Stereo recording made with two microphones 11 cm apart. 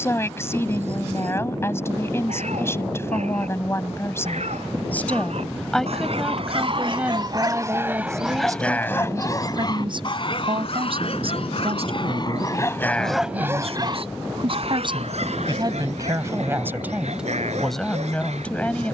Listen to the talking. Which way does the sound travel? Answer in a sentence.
In this clip you hear the talking go right and come back.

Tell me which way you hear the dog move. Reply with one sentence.
You can hear the dog move from right to left and back again.